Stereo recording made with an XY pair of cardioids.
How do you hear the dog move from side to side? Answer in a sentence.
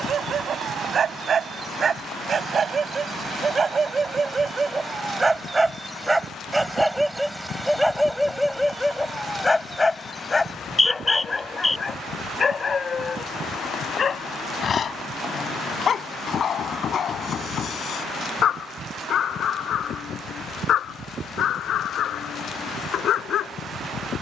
You can hear the dog go from the right side to the left.